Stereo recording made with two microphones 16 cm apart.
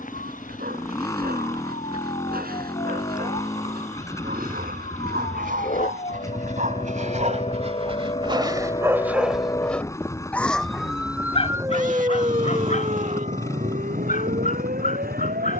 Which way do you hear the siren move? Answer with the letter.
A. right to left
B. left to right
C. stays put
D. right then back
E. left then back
B.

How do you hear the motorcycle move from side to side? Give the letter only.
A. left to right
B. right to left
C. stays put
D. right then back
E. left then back
C.